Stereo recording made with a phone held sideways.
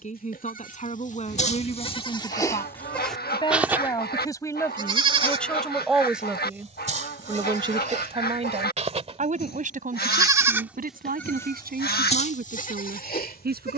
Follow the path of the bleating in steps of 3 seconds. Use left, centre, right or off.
left, right, right, centre, left.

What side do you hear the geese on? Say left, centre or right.
left.